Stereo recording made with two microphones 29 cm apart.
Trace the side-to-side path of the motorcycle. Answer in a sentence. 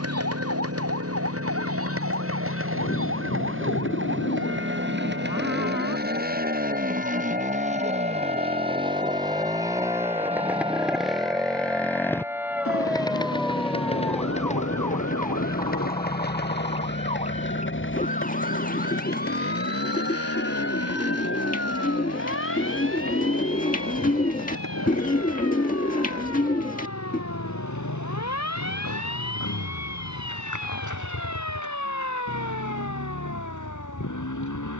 You can hear the motorcycle move to the left.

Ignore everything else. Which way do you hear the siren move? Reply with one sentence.
In this clip you hear the siren go from the right side to the left.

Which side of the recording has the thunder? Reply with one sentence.
You can hear the thunder on the left.